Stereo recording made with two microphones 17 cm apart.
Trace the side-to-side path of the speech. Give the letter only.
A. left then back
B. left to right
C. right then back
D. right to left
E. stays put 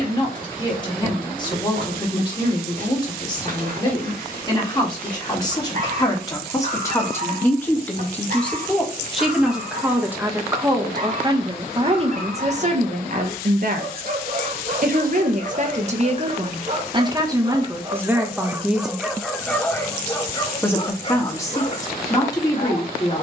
C.